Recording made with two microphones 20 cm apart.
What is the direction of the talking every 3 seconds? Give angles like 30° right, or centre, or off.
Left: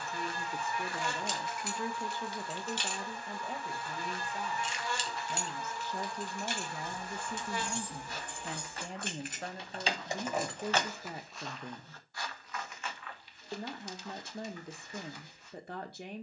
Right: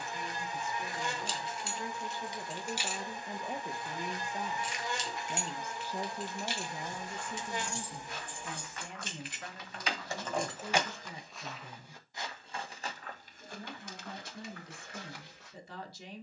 40° left, 20° right, 10° left, 50° left, 60° left, 60° left.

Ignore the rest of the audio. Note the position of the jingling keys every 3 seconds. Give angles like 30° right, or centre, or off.
20° right, 30° left, 60° left, 20° left, off, off.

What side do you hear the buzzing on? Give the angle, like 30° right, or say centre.
20° right.